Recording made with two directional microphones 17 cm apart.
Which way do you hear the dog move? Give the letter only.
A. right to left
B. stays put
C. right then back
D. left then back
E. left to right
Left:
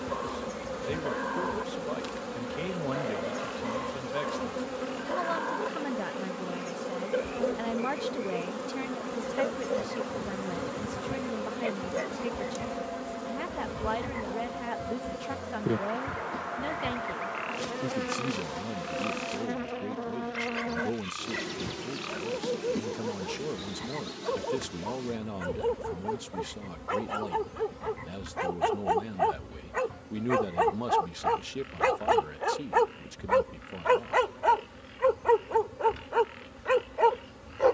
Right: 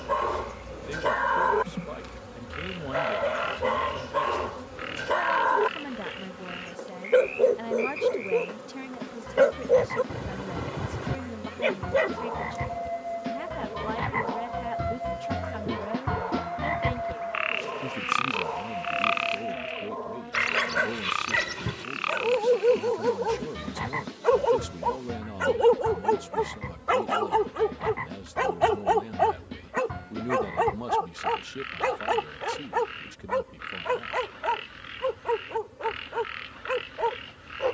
A.